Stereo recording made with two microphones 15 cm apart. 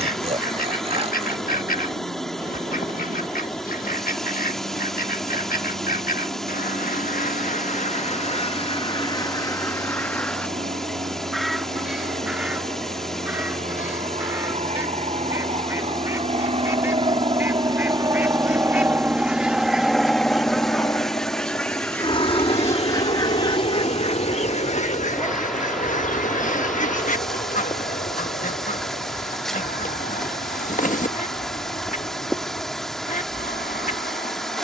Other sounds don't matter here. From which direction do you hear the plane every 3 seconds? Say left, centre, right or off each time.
right, right, right, right, right, right, centre, left, left, left, left, left.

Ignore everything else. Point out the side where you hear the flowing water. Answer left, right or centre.
centre.